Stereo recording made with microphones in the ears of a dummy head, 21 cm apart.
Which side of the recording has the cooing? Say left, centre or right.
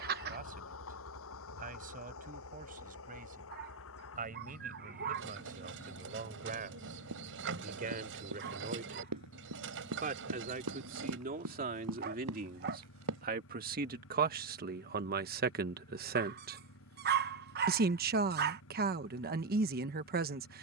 right.